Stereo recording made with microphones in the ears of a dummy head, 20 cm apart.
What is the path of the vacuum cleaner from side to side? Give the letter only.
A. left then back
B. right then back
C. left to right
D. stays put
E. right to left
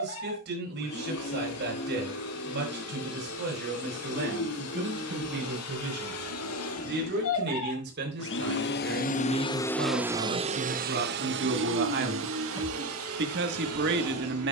C.